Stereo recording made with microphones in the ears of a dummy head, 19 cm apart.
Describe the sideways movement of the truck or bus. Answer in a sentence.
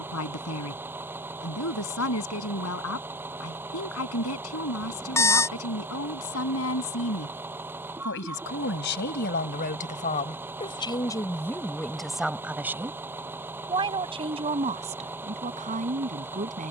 You can hear the truck or bus stay put.